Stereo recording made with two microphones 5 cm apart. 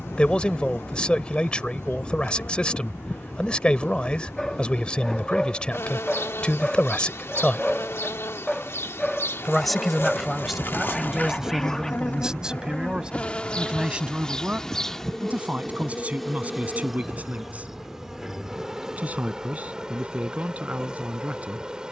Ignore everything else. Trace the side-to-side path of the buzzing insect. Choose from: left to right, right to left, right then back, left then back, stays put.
left to right.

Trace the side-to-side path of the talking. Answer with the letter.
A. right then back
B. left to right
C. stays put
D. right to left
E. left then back
B.